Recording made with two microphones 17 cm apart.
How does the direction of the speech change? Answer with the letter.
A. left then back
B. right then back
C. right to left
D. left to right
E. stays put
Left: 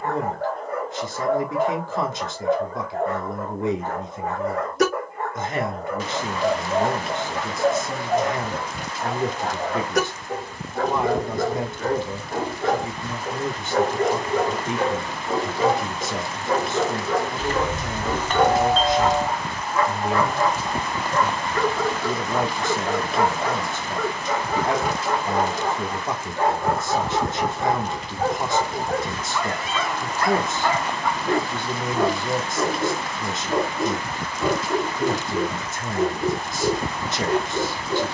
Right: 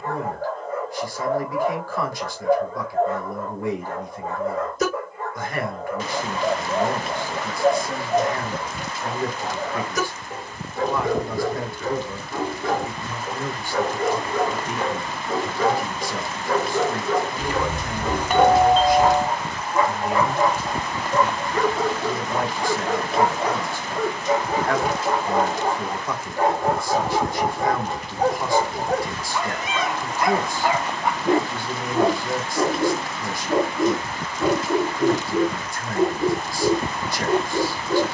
E.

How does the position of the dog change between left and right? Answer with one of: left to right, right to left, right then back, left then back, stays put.
left to right.